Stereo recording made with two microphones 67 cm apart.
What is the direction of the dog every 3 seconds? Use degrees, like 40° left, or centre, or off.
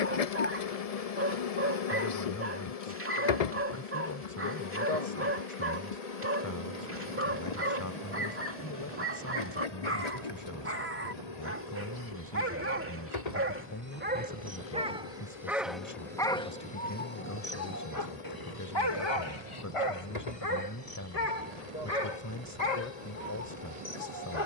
20° right, 20° right, 20° right, 20° right, 20° right, 10° left, 50° left, 70° left.